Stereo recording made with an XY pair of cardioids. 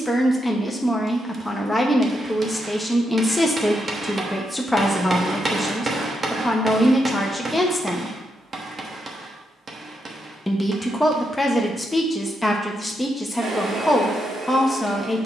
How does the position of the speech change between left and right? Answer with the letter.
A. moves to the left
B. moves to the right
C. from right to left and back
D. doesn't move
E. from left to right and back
D.